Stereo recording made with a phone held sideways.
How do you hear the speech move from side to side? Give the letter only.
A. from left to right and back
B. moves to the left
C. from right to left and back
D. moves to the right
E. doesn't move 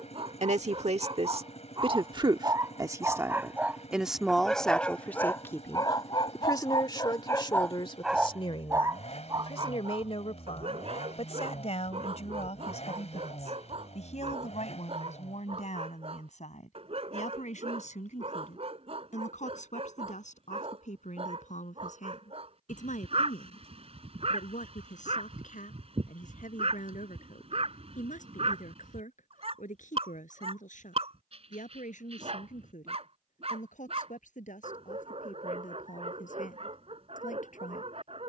B.